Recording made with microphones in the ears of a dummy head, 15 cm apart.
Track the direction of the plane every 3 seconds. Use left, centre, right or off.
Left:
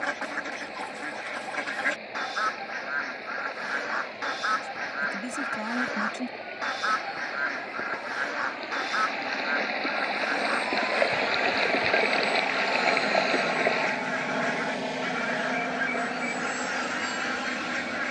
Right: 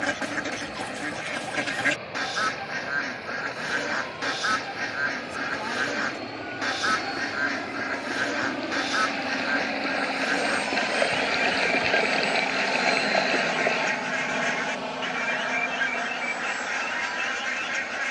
right, right, right, right, centre, left.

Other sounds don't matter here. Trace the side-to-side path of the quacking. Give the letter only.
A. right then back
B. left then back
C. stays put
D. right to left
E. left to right
C.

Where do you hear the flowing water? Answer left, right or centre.
centre.